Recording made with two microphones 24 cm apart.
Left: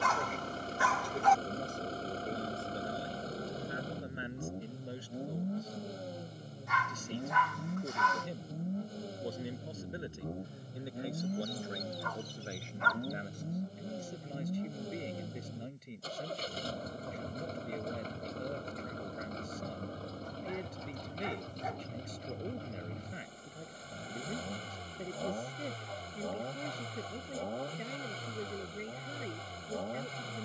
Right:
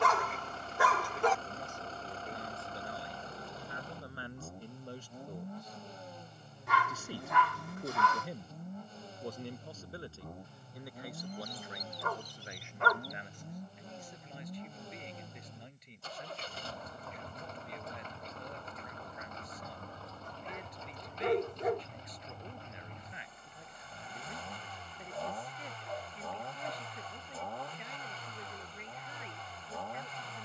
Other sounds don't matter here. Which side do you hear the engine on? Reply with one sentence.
In this clip you hear the engine on the left.